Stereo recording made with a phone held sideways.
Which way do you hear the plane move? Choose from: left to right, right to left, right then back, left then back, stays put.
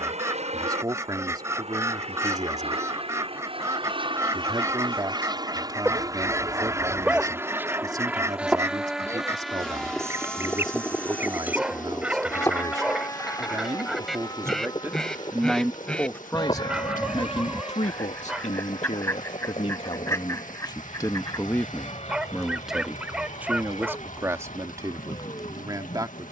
right to left.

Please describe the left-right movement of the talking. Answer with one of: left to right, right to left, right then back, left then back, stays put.
left then back.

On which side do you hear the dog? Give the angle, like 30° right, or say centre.
10° right.